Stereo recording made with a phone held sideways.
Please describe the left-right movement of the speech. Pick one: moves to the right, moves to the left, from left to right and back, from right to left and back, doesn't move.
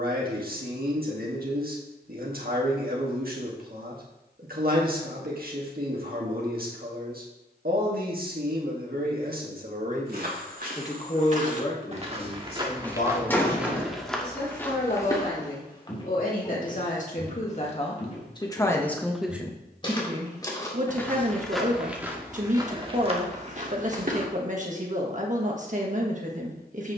from right to left and back.